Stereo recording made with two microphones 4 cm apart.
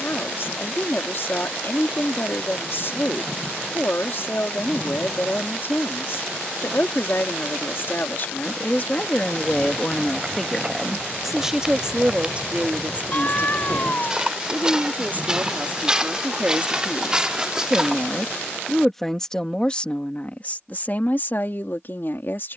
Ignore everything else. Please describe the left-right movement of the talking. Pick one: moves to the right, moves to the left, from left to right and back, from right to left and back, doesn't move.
from left to right and back.